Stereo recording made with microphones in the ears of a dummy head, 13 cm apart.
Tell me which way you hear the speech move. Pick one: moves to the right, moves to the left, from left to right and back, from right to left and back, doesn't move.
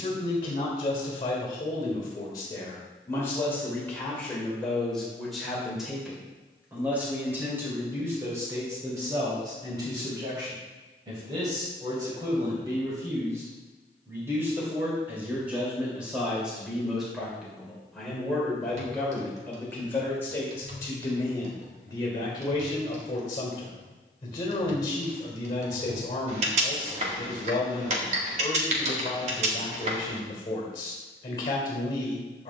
from left to right and back.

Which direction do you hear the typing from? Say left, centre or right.
right.